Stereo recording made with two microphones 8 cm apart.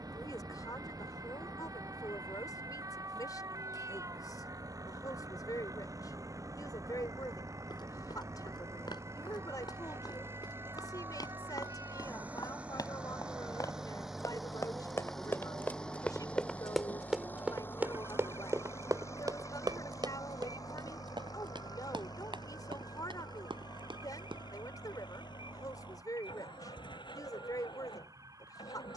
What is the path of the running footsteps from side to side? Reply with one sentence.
You can hear the running footsteps move to the right.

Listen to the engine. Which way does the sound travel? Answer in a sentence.
In this clip you hear the engine move to the left.